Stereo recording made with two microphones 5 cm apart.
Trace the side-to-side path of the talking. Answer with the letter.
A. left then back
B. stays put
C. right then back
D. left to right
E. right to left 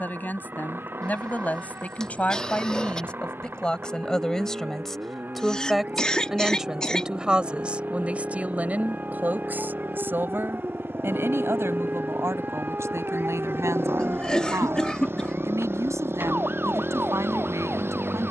D.